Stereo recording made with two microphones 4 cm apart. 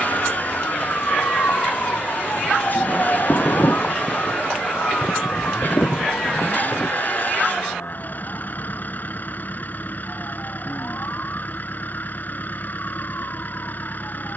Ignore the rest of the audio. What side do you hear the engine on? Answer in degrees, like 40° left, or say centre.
40° left.